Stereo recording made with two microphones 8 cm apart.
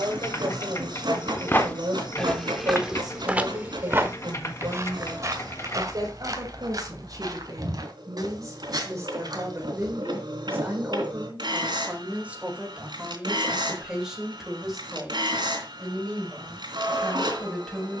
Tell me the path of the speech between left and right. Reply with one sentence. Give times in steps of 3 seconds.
In this clip you hear the speech on the right from 0 s and in the centre from 12 s.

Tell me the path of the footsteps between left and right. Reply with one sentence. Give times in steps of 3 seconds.
In this clip you hear the footsteps in the centre from 0 s, on the right from 3 s and not at all from 12 s.